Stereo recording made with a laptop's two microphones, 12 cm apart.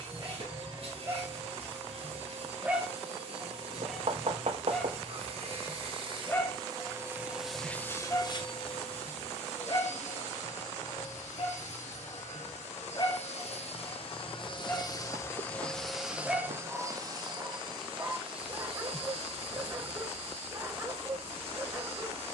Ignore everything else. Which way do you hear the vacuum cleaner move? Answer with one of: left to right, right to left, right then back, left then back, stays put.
left then back.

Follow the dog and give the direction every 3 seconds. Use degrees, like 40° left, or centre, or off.
20° right, centre, 30° left, 40° left, 30° left, 10° right, 30° right, 30° right.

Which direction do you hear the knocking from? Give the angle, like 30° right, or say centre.
60° right.